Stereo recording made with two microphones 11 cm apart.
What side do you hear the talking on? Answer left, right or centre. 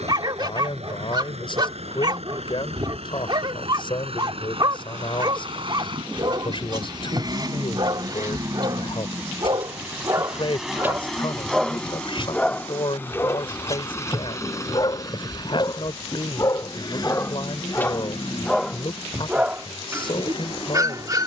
left.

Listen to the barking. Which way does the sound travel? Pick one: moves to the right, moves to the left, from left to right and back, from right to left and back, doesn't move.
from right to left and back.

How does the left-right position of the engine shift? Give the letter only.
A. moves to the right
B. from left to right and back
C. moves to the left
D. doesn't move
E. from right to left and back
C.